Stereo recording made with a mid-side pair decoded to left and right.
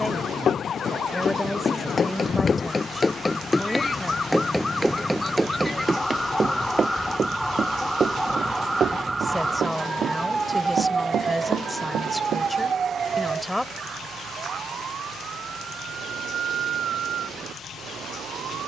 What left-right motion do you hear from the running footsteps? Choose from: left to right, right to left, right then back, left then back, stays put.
left to right.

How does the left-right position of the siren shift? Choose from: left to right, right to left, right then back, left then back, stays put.
left to right.